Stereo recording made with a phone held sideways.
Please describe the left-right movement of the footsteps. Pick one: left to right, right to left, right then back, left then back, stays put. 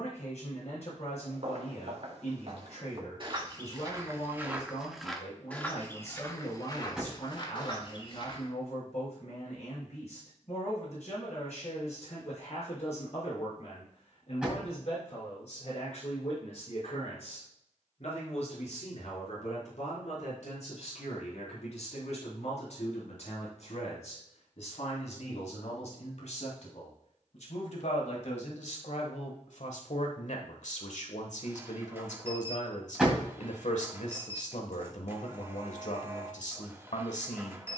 right to left.